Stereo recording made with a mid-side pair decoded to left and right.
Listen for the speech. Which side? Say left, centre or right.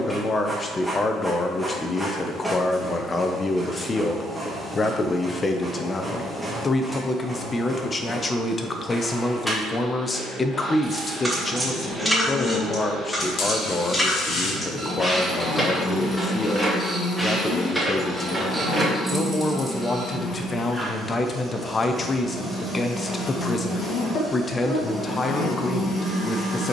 left.